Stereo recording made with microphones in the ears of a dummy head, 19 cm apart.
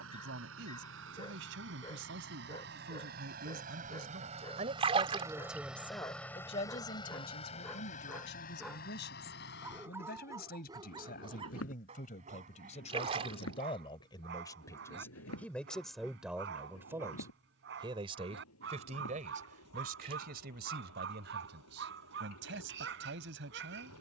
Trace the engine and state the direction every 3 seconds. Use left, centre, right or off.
right, right, left, left, left, left, left, left.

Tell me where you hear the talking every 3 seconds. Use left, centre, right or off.
right, right, left, left, left, centre, right, right.